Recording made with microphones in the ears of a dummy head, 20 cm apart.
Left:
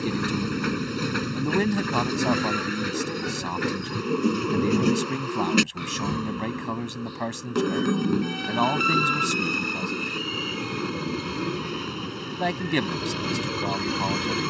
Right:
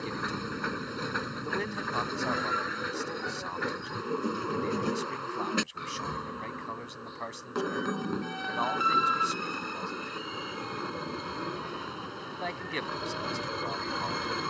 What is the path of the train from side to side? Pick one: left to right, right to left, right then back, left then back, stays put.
stays put.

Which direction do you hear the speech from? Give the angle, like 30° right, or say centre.
70° left.